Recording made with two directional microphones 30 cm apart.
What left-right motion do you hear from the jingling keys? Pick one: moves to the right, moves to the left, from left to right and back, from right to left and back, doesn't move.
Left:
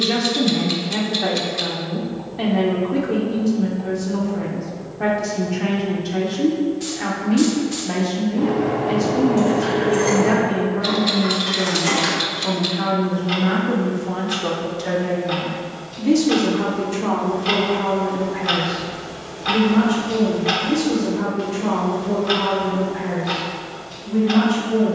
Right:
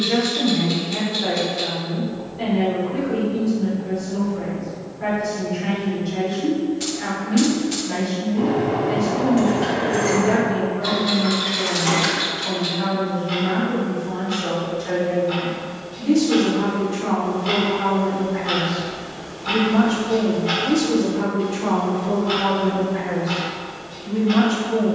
moves to the left.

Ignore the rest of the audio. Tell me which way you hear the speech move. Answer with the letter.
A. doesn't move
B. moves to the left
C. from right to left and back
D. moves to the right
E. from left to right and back
D.